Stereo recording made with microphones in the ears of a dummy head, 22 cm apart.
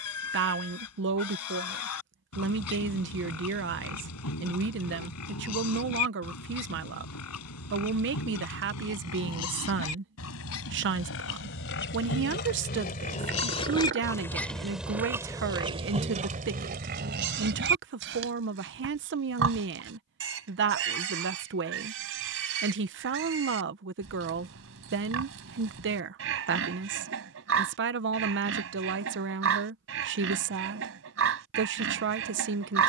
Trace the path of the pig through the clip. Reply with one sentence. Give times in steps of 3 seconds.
In this clip you hear the pig on the left from 0 s and on the right from 15 s.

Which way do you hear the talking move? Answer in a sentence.
In this clip you hear the talking stay in one place.